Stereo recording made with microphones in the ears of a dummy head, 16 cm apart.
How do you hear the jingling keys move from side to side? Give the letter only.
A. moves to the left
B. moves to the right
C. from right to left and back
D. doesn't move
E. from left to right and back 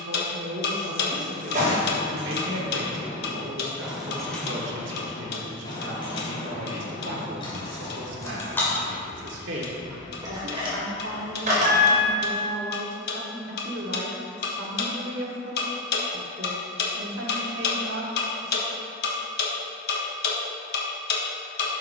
C.